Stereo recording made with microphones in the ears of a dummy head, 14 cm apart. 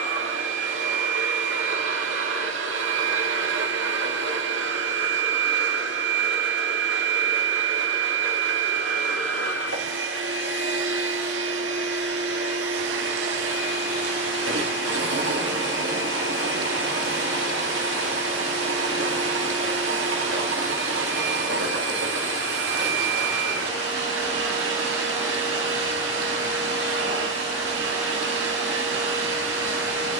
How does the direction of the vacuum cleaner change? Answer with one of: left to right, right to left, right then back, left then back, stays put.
stays put.